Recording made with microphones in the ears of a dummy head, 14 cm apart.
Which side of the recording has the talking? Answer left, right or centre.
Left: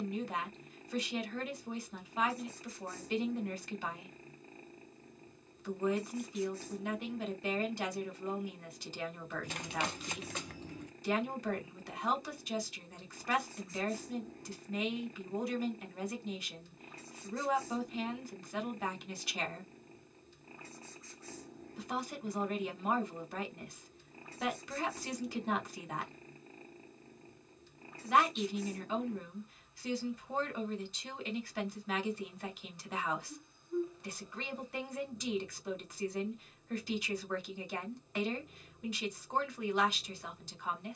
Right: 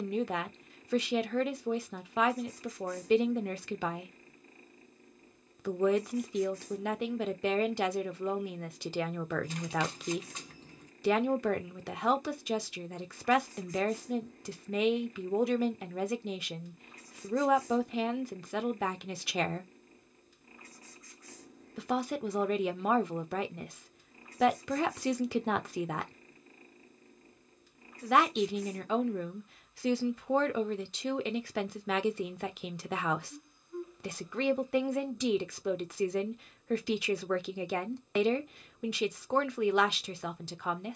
right.